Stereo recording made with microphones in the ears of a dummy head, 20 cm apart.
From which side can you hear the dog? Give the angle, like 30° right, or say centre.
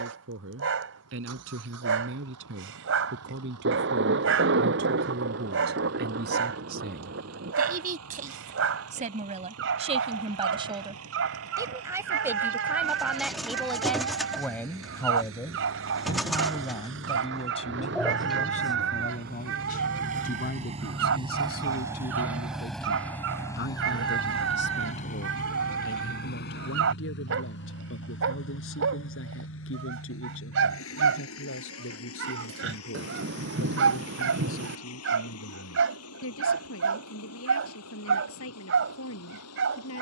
70° right.